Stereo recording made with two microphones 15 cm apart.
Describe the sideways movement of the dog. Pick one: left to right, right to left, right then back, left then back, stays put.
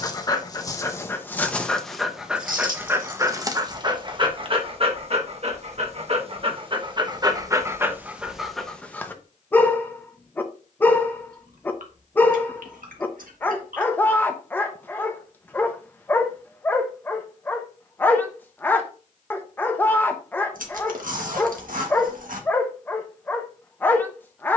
right then back.